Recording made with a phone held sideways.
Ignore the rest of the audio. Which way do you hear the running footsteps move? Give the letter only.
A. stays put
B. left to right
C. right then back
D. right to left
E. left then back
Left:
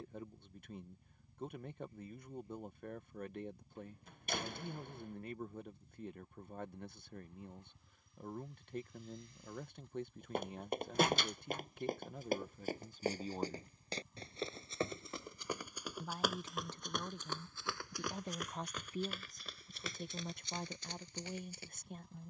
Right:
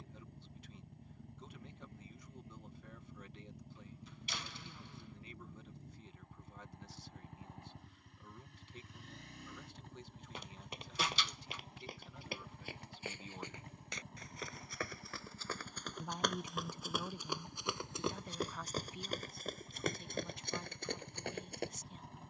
B.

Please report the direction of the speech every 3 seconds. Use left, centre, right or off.
left, left, left, left, left, centre, left, left.